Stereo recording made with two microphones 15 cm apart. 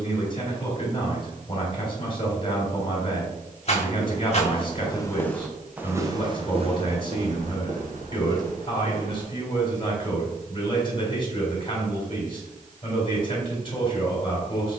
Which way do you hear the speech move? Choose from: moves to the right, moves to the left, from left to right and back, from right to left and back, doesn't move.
doesn't move.